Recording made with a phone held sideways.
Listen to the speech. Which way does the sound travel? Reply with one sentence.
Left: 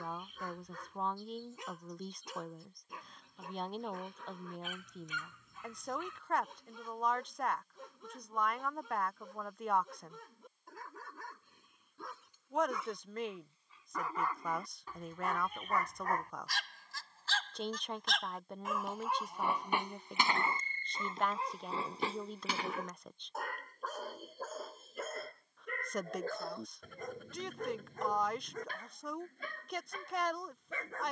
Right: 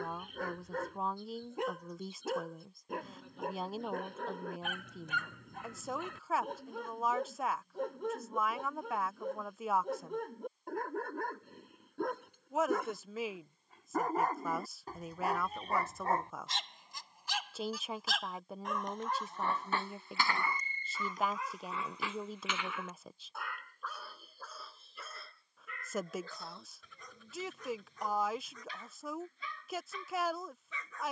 In this clip you hear the speech stay put.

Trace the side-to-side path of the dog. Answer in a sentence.
In this clip you hear the dog move from right to left.